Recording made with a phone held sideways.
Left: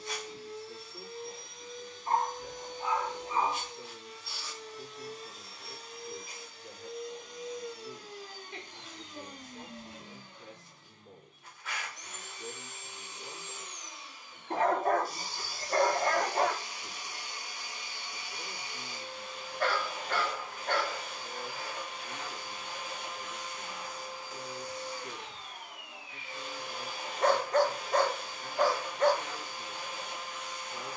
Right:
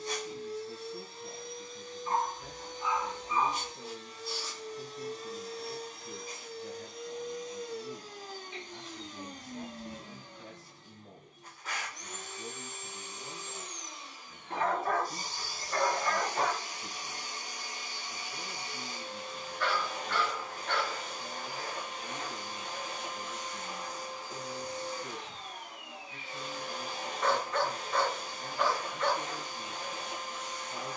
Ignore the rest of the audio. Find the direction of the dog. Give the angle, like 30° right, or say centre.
40° left.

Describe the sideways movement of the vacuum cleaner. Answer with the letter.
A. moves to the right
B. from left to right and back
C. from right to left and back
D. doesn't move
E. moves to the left
D.